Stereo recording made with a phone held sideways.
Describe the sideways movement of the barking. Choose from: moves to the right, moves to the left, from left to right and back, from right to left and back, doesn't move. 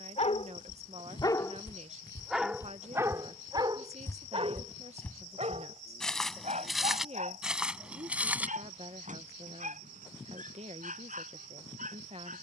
moves to the right.